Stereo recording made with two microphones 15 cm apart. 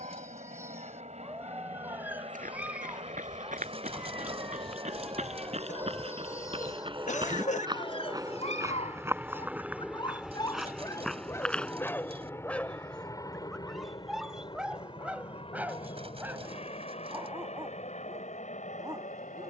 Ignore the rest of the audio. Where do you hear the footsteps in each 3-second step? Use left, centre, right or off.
right, right, right, centre, off, off, off.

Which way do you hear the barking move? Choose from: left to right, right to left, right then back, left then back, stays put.
left then back.